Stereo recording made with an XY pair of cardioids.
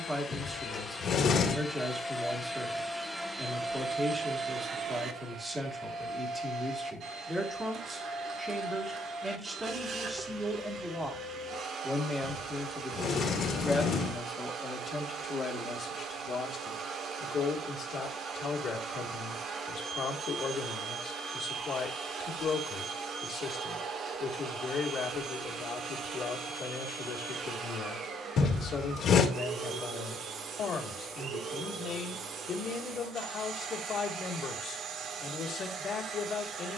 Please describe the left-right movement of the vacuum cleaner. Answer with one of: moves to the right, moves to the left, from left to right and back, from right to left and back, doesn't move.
moves to the right.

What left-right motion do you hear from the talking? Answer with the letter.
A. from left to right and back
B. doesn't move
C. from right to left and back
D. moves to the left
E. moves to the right
D.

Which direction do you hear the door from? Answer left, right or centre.
left.